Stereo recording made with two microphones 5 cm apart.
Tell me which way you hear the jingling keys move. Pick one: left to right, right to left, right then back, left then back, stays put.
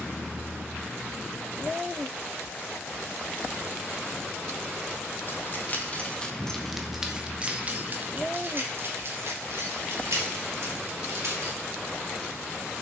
left to right.